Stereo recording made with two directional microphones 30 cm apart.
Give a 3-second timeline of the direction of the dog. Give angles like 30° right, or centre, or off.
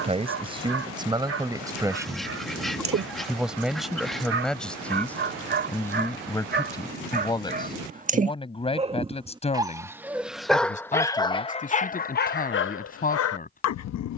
50° right, 40° right, 30° right, centre, 50° left.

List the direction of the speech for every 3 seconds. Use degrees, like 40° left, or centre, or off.
10° right, centre, 10° left, 20° left, 30° left.